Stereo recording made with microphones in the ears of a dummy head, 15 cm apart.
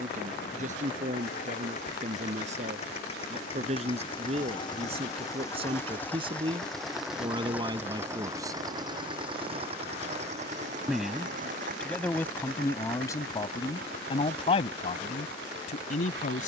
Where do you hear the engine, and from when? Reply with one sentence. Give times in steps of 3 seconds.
You can hear the engine on the left from 0 s, in the centre from 6 s and on the right from 9 s.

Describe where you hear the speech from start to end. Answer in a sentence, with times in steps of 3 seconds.
You can hear the speech on the right from 0 s, in the centre from 9 s and on the left from 12 s.